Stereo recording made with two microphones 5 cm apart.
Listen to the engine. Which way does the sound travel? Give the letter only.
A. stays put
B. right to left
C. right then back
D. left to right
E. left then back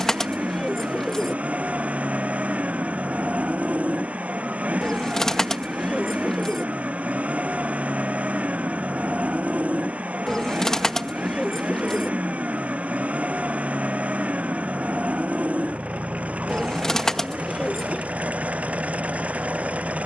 A.